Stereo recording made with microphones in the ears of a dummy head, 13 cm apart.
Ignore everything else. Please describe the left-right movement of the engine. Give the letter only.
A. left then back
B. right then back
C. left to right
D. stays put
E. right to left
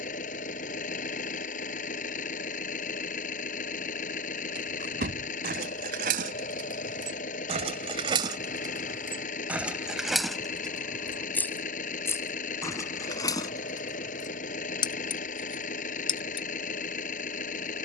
D.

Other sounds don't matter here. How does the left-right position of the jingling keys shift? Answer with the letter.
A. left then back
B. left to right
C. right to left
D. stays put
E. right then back
C.